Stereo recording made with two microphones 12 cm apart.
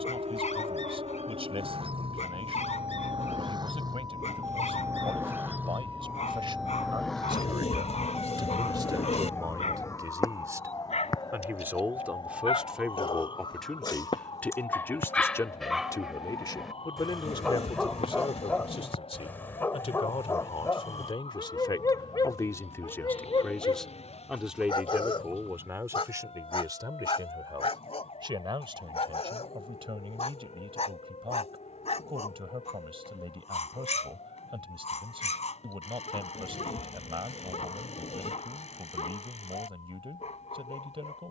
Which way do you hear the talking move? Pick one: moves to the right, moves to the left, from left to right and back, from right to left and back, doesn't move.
from right to left and back.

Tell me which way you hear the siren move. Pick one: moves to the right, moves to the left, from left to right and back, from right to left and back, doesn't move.
moves to the left.